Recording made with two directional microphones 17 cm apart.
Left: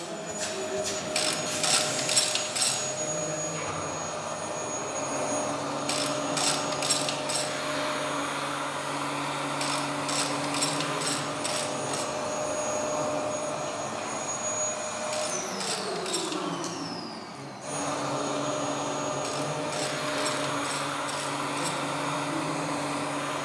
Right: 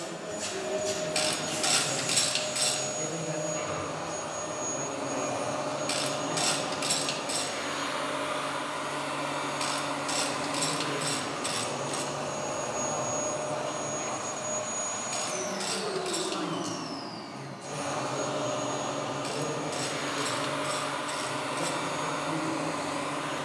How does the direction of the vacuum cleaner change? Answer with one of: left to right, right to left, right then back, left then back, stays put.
stays put.